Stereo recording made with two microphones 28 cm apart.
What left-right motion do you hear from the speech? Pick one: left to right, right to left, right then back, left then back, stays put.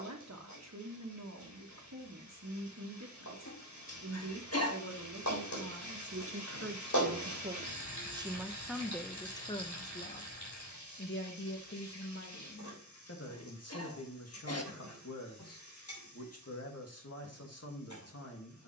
right to left.